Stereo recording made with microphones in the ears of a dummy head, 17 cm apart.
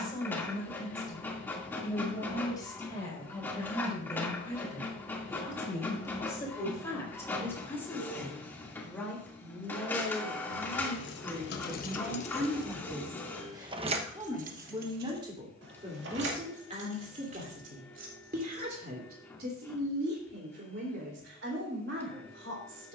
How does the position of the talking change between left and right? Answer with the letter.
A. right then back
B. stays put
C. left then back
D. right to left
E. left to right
E.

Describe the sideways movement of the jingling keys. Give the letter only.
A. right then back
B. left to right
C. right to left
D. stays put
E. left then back
B.